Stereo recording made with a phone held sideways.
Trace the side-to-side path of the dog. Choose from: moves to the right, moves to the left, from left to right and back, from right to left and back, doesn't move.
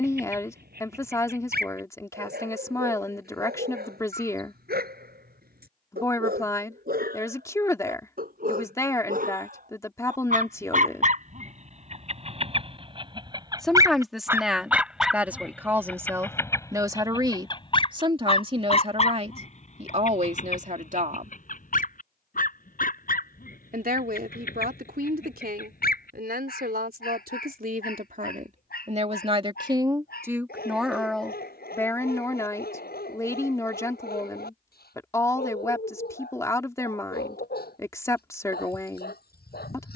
moves to the left.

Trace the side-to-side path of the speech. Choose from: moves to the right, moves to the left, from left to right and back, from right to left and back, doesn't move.
from left to right and back.